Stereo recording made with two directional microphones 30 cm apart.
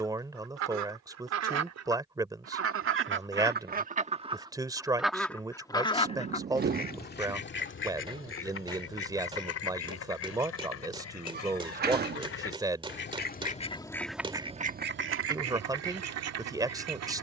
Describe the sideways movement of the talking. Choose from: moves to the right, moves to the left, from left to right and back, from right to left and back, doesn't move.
doesn't move.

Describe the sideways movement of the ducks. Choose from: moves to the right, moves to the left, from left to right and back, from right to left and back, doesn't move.
from right to left and back.